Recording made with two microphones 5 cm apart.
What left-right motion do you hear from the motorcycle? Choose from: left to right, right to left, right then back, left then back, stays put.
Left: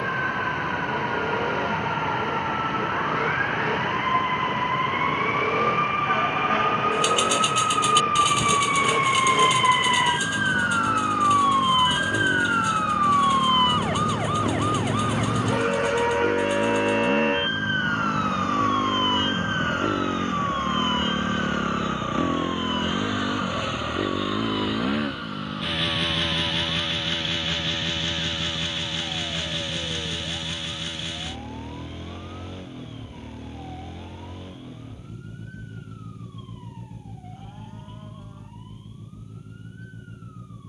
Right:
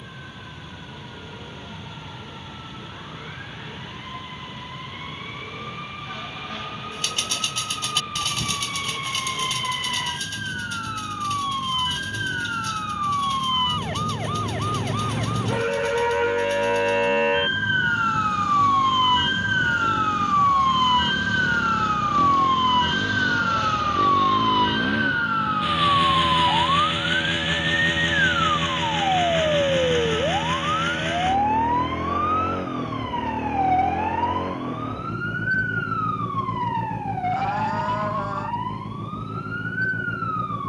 left to right.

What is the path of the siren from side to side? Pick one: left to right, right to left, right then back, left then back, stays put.
left to right.